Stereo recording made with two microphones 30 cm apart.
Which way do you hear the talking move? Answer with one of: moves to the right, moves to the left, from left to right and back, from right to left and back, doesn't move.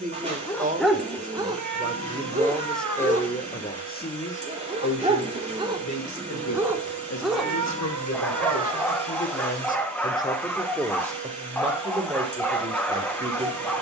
from right to left and back.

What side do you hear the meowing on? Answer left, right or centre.
right.